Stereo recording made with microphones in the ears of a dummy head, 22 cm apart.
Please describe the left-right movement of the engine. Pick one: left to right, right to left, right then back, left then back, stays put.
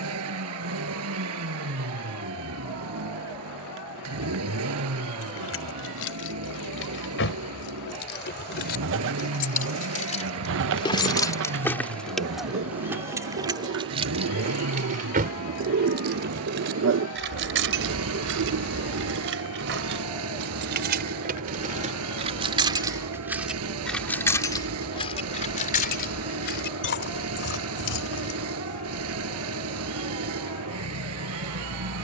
stays put.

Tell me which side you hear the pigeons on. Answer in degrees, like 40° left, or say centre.
60° right.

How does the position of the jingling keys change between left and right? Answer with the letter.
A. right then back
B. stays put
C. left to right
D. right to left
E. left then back
A.